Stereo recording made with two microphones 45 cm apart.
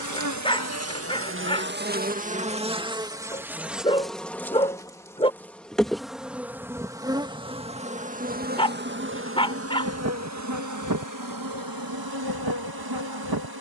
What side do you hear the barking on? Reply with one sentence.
In this clip you hear the barking in the centre.